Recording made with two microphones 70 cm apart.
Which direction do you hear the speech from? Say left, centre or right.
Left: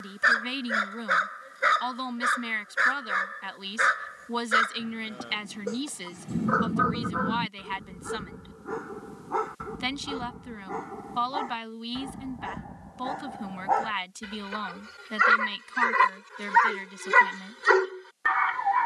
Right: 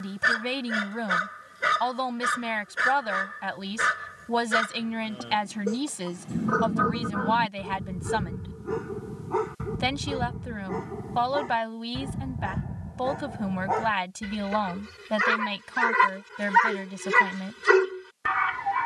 right.